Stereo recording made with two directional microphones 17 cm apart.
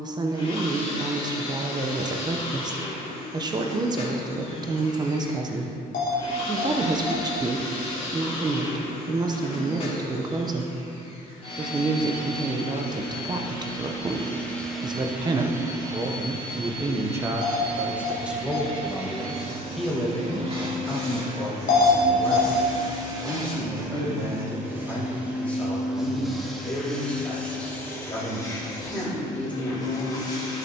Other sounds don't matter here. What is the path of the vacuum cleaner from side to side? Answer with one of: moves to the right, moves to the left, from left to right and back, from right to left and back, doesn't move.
from left to right and back.